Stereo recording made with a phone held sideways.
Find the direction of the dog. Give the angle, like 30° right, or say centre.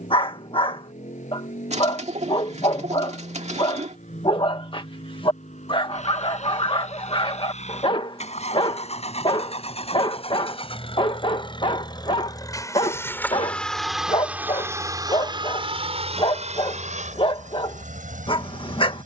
40° left.